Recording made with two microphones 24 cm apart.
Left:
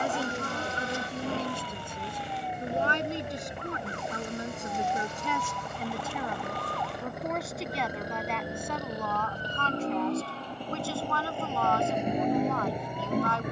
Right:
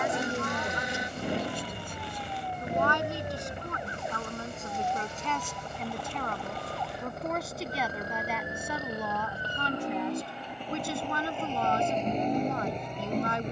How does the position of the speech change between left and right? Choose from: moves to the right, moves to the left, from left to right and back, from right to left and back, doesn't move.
moves to the right.